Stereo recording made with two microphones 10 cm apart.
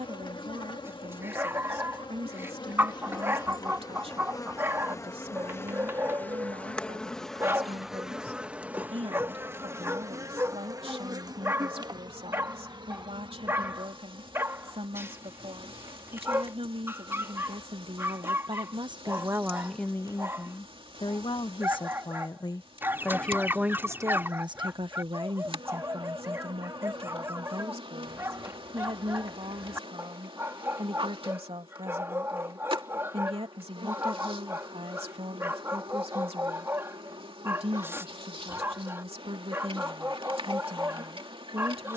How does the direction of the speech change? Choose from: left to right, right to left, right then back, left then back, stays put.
left then back.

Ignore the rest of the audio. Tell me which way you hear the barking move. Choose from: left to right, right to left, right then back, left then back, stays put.
stays put.